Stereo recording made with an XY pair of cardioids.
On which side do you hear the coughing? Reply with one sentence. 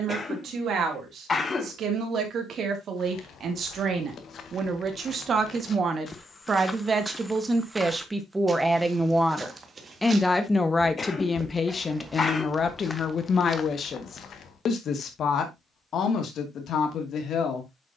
You can hear the coughing on the left.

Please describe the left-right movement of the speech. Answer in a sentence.
In this clip you hear the speech travel towards the left.